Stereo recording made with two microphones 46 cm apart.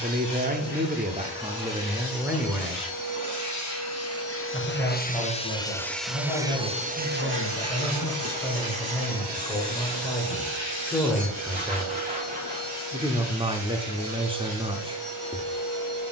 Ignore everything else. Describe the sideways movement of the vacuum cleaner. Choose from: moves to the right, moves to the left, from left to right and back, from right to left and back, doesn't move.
moves to the right.